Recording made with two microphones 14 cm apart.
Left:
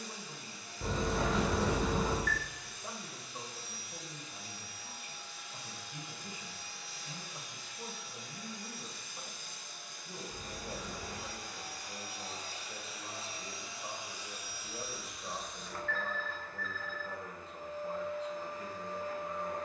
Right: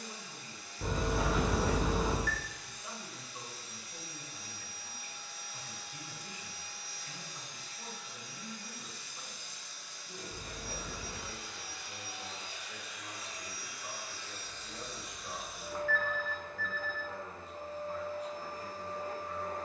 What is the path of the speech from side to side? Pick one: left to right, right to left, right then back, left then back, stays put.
stays put.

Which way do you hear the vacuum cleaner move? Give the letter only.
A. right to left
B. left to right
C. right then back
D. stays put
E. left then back
B.